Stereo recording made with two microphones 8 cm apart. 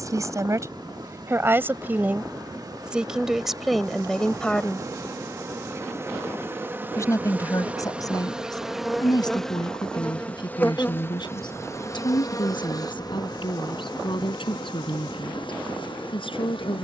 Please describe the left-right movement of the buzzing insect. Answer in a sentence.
You can hear the buzzing insect go from the right side to the left.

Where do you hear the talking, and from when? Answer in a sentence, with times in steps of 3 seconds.
You can hear the talking on the right from 0 s, in the centre from 3 s and on the left from 6 s.